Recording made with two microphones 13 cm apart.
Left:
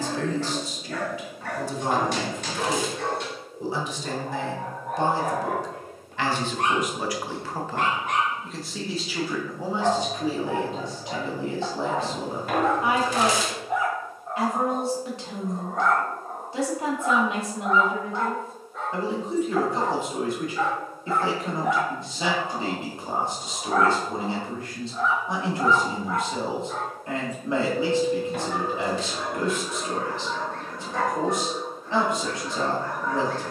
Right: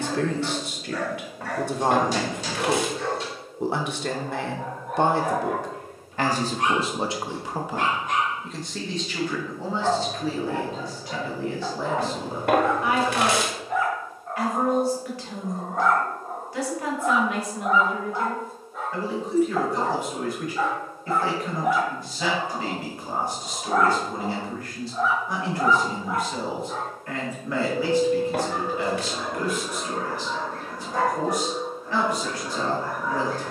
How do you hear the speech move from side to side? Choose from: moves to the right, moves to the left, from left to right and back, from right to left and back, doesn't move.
moves to the left.